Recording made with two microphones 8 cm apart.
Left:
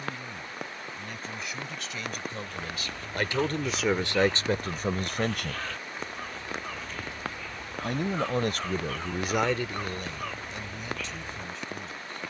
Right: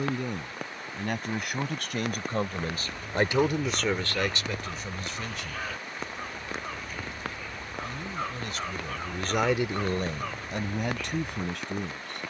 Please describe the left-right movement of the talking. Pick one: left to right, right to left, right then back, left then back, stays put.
left then back.